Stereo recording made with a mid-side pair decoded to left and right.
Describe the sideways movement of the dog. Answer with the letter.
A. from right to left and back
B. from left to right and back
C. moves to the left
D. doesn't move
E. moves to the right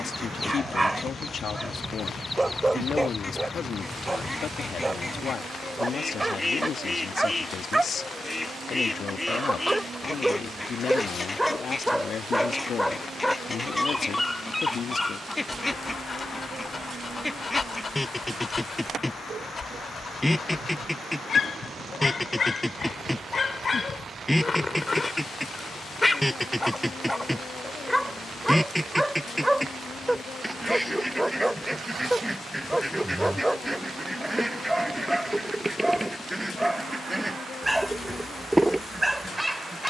A.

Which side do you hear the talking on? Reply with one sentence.
You can hear the talking on the left.